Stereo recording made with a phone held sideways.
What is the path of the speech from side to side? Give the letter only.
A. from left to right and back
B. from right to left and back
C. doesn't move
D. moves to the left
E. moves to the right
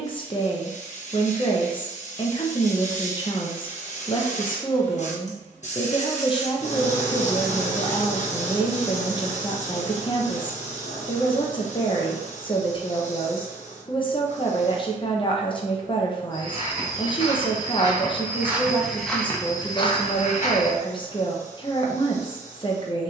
C.